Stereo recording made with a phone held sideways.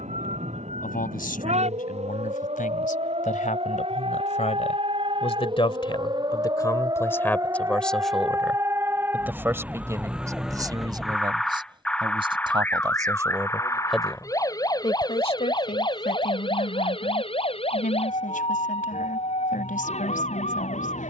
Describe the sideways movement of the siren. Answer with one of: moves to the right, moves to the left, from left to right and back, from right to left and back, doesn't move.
moves to the left.